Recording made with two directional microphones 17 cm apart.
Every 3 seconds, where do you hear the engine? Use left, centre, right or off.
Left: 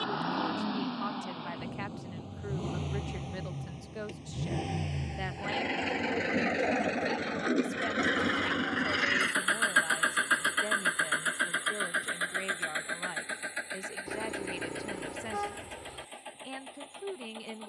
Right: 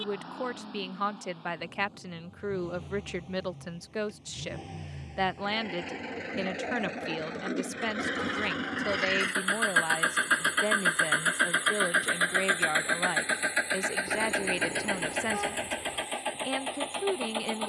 left, left, left, centre, right, right.